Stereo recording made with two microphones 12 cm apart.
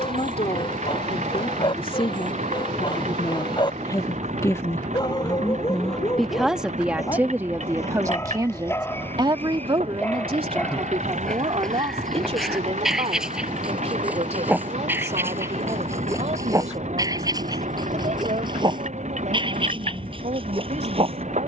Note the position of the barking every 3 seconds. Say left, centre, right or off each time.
left, left, left, centre, centre, right, right.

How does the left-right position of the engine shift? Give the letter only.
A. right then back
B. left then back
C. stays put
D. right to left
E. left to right
C.